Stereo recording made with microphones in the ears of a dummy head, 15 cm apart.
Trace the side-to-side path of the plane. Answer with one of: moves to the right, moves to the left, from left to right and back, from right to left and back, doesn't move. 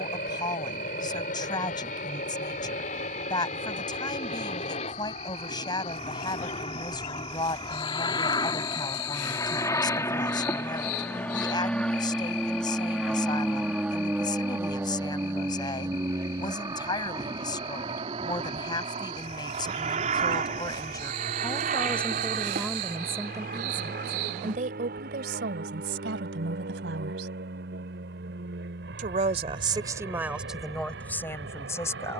moves to the right.